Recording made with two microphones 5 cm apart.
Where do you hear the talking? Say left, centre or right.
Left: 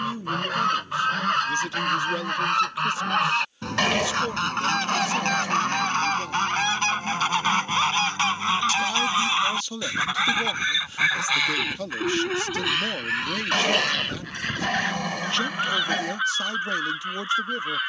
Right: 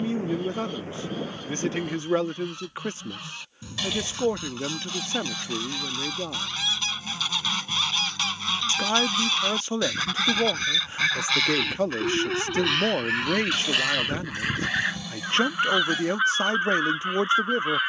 right.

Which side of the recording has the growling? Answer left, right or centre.
left.